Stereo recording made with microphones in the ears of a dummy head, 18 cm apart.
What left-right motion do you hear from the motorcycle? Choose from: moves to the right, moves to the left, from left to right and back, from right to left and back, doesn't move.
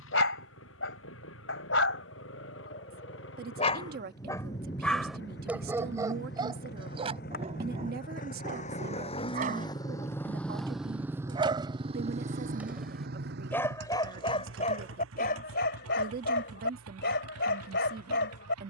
moves to the right.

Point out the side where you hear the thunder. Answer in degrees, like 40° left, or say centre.
20° left.